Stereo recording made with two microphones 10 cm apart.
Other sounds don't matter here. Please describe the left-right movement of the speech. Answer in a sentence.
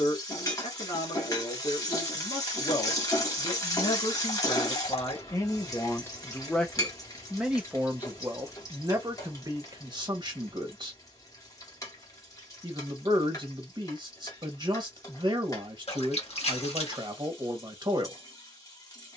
You can hear the speech move to the right.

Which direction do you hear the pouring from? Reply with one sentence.
In this clip you hear the pouring on the left.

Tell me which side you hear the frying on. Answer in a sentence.
You can hear the frying on the left.